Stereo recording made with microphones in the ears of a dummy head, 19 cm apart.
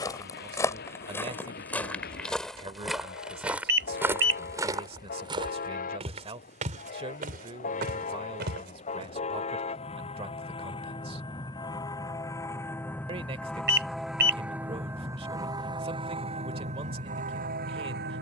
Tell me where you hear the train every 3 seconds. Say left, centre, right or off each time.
left, left, left, left, centre, right.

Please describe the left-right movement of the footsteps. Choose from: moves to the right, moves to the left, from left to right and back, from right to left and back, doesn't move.
moves to the right.